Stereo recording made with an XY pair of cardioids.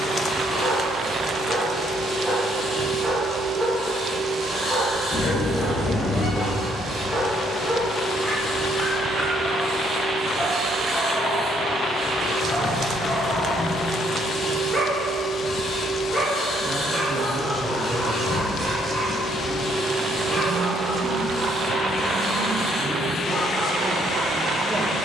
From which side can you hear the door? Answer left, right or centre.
left.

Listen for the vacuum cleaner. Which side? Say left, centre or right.
left.